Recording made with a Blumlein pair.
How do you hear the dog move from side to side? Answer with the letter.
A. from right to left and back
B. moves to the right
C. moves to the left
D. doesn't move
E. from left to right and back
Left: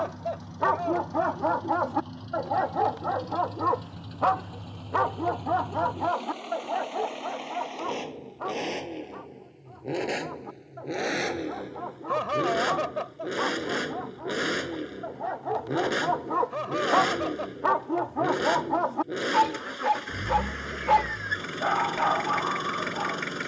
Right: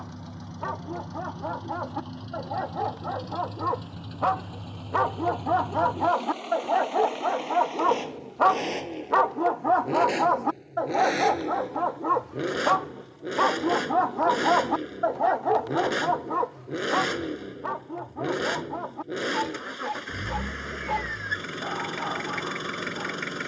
E.